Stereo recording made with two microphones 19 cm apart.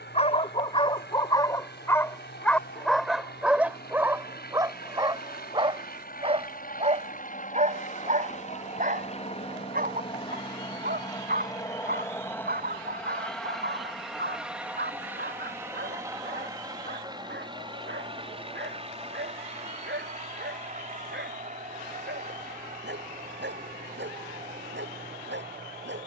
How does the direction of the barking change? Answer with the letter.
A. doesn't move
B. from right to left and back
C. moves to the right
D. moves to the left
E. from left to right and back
C.